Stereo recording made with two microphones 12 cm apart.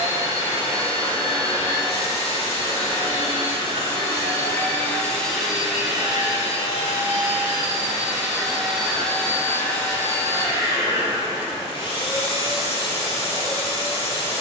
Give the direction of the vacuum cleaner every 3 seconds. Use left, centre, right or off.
left, left, centre, left, left.